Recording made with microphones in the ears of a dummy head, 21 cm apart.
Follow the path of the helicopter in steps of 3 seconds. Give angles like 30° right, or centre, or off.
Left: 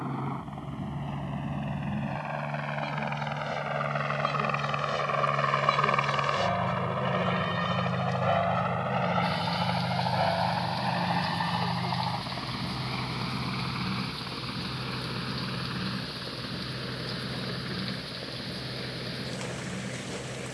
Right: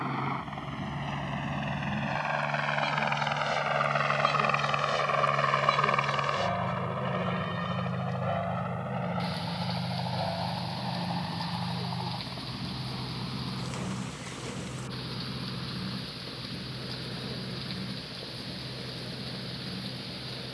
50° right, 20° right, 20° left, 50° left, 60° left, 70° left, 70° left.